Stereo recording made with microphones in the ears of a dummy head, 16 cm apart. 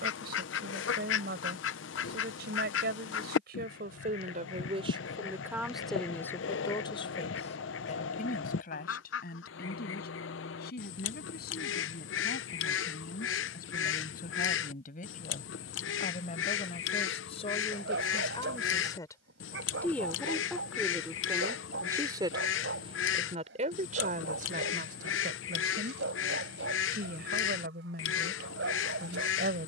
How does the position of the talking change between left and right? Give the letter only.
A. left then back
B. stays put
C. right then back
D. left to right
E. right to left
A.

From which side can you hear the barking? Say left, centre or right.
right.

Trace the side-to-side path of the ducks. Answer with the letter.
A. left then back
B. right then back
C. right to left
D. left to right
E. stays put
E.